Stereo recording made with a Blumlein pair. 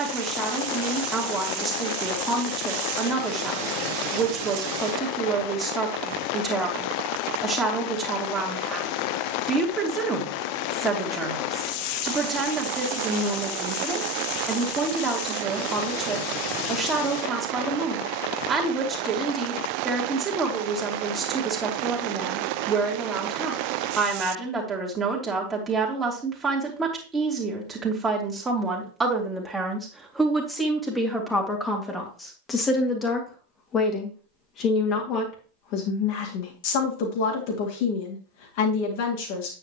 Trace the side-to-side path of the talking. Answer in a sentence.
In this clip you hear the talking travel towards the left.